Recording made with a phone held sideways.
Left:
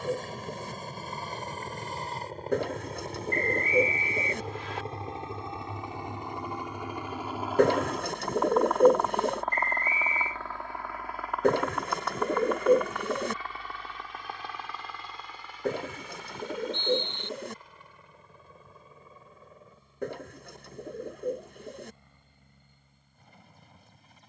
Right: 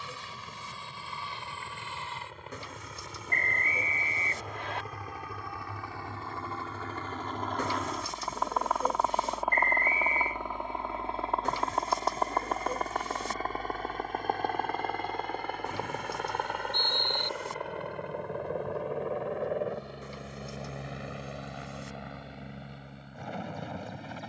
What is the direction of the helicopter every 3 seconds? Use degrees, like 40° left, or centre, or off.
40° left, 30° left, 10° left, 20° right, 40° right, 60° right, 70° right, 70° right.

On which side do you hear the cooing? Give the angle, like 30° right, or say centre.
60° left.